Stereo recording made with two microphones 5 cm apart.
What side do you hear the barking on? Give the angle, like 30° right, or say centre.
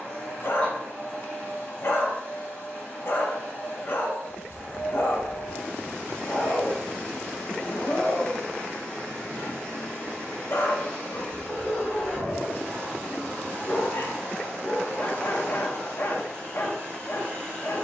50° left.